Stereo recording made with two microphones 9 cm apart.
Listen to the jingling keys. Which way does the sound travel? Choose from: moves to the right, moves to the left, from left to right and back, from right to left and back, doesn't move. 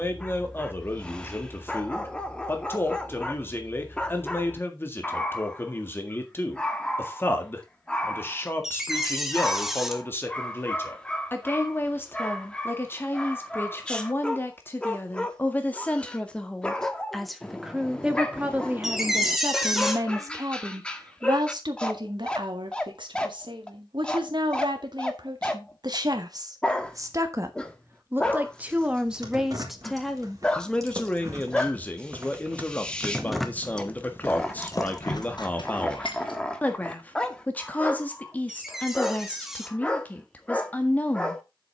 moves to the left.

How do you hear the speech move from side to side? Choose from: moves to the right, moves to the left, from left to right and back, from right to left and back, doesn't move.
from left to right and back.